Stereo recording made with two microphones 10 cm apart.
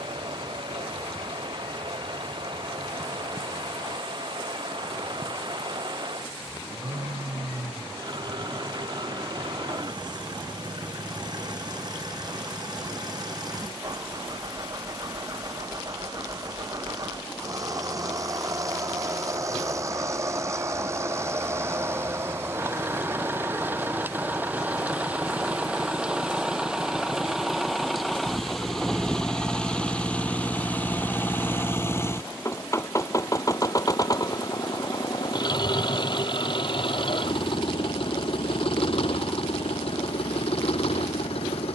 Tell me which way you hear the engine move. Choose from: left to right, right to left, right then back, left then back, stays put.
right to left.